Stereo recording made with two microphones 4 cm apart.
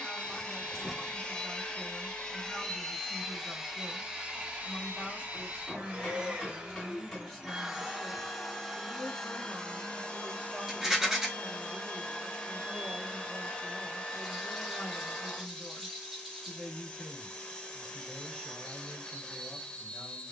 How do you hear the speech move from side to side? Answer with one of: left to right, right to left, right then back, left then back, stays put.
right then back.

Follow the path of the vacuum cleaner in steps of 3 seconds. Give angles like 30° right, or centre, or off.
20° left, 30° right, 10° right, 20° left, 20° left, 20° left, 20° left.